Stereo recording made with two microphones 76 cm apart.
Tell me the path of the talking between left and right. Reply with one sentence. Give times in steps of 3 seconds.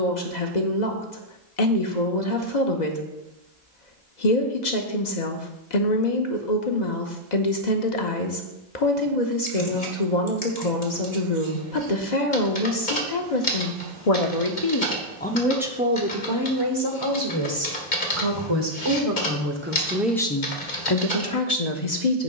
In this clip you hear the talking on the left from 0 s, on the right from 15 s, in the centre from 18 s and on the left from 21 s.